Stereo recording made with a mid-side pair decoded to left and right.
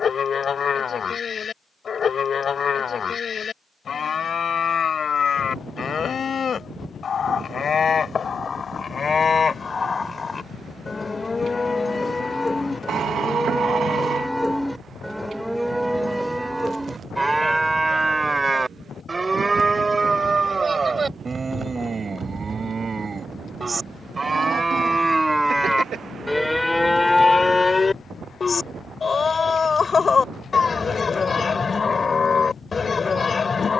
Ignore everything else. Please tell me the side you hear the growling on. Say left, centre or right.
right.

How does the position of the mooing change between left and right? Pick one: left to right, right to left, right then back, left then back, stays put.
right then back.